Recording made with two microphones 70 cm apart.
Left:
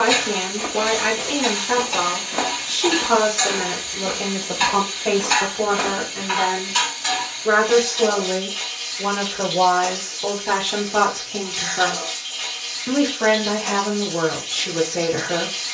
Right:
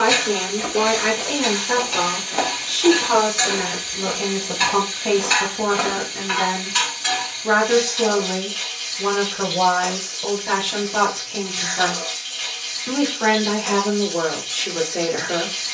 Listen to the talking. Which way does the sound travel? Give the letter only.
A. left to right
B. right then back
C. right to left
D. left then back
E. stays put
B.